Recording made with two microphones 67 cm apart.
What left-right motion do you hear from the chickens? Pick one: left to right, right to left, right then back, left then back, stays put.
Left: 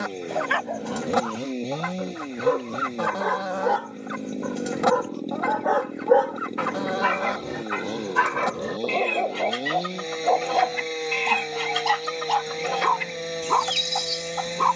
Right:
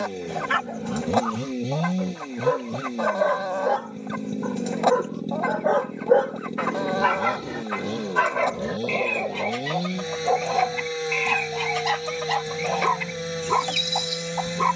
stays put.